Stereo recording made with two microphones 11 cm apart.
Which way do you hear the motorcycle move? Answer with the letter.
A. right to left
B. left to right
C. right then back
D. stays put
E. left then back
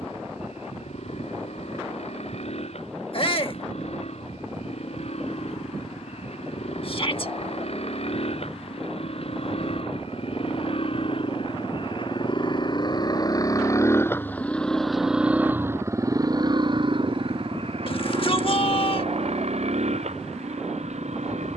B.